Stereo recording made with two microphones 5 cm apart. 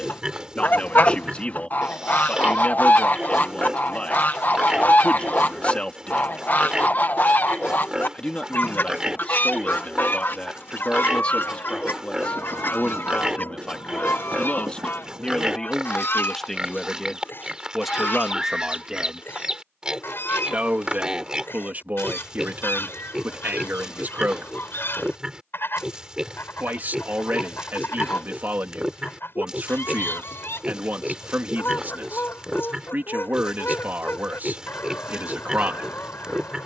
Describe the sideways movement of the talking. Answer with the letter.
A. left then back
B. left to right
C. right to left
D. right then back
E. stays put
B.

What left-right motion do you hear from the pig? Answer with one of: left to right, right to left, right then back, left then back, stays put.
stays put.